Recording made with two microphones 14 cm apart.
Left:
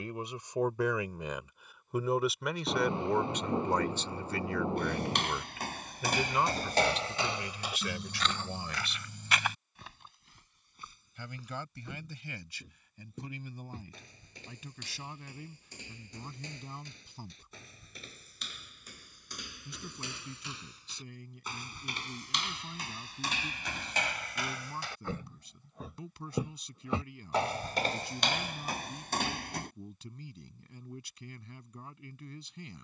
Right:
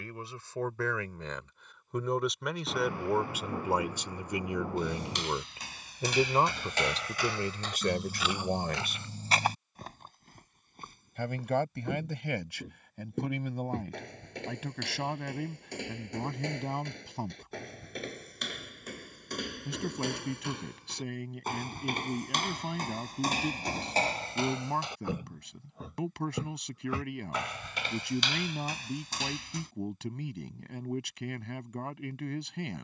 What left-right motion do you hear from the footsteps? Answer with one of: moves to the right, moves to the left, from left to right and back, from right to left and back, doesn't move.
from left to right and back.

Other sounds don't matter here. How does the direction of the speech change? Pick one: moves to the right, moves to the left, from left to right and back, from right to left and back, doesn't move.
moves to the right.